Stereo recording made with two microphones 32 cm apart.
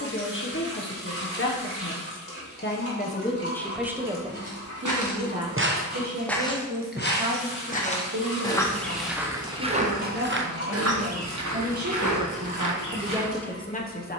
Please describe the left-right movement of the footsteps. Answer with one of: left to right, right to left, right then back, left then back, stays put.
left then back.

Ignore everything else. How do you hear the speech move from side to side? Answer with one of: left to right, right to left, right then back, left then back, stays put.
right then back.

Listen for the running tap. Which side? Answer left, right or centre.
left.